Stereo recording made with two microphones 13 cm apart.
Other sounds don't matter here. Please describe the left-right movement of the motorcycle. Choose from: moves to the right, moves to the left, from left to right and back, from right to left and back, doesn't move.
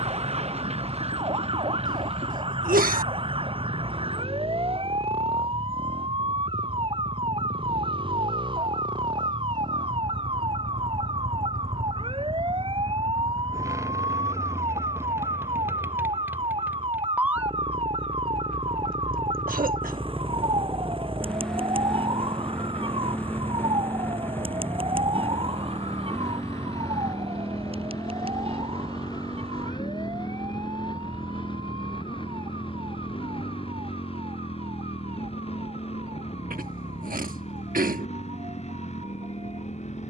moves to the left.